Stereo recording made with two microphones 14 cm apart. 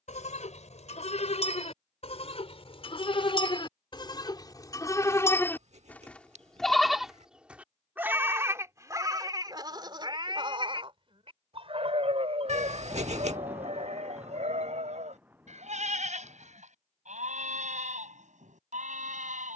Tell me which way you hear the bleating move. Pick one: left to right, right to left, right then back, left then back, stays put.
left to right.